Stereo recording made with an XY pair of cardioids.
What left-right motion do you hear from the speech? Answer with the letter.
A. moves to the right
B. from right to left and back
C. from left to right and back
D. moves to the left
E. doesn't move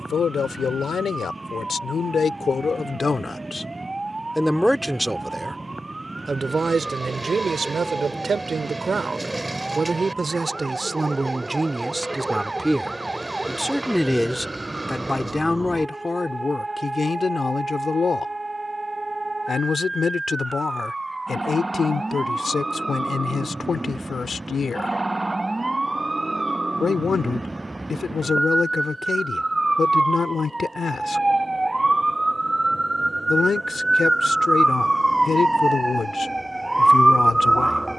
C.